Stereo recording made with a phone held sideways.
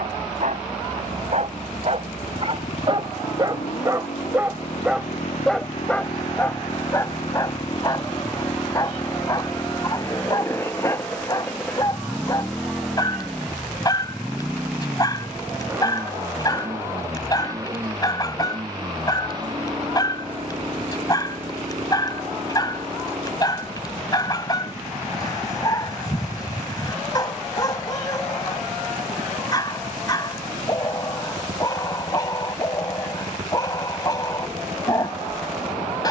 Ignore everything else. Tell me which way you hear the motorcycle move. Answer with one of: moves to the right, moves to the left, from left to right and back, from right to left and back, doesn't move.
moves to the right.